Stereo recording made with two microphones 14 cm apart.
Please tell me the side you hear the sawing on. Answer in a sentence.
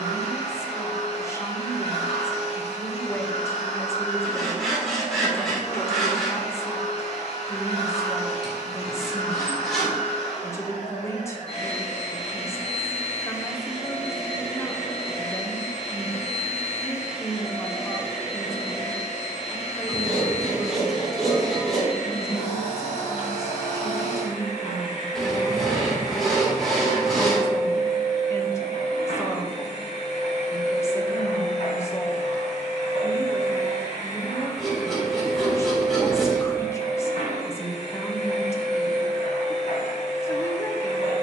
In this clip you hear the sawing in the centre.